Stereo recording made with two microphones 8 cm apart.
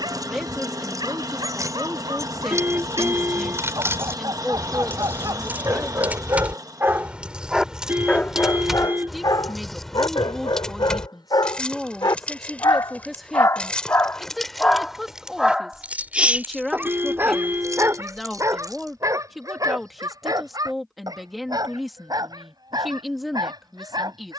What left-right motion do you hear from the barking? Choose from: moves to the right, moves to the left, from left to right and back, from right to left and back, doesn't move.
from right to left and back.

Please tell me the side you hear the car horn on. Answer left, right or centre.
right.